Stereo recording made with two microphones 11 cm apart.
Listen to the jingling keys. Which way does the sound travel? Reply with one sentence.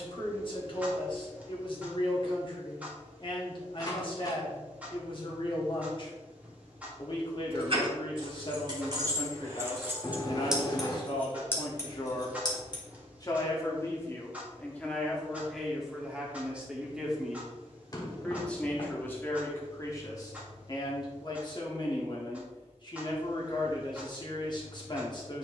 You can hear the jingling keys travel towards the left.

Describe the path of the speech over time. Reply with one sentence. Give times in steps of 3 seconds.
In this clip you hear the speech on the left from 0 s, in the centre from 15 s and on the left from 18 s.